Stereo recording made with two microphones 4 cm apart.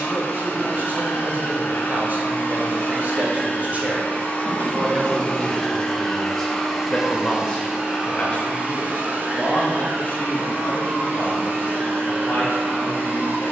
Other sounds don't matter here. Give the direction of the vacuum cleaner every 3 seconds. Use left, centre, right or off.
left, left, centre, right, right.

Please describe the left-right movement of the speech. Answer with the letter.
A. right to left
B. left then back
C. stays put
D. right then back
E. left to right
A.